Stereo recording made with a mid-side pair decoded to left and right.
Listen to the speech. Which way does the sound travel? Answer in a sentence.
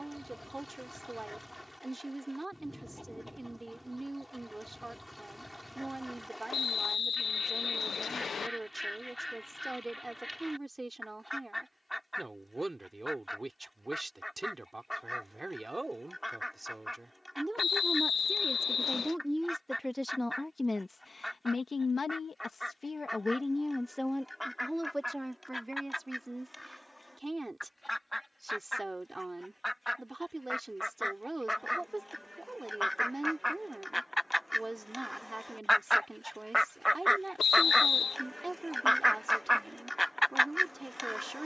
You can hear the speech move from right to left and back again.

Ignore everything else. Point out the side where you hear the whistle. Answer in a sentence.
In this clip you hear the whistle on the left.